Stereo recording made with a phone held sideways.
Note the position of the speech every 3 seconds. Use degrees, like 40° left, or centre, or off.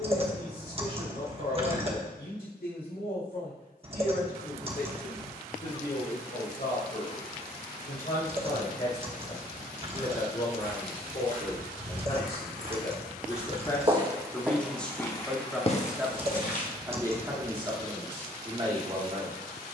70° left, 60° left, 60° left, 40° left, 20° left, 10° right, 40° right.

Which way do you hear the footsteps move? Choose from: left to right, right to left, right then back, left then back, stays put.
right to left.